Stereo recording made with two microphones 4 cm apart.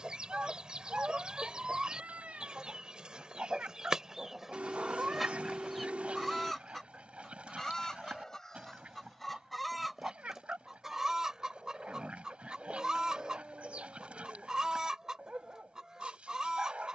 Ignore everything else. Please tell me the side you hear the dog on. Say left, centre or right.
right.